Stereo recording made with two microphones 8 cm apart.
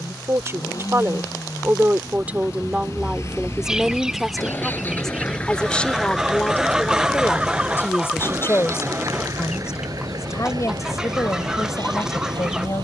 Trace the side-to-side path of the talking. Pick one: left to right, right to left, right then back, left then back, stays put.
right to left.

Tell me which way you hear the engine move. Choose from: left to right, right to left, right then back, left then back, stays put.
left to right.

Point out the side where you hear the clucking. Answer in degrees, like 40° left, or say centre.
10° right.